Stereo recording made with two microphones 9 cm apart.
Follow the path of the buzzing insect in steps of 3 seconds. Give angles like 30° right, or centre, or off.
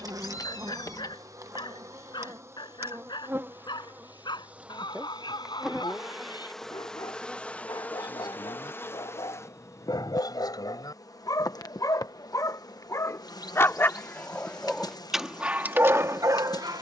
40° right, 20° right, 10° left, 40° left, 50° left, 50° left.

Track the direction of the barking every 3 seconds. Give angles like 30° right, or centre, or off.
60° left, 60° left, 60° left, 50° left, 30° left, 30° right.